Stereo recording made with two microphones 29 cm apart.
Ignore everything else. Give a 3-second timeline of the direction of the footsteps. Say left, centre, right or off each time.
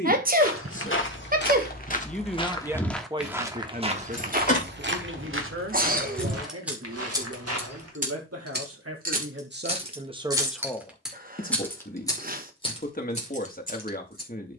left, right, right, off, off.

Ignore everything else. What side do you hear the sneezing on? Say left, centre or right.
right.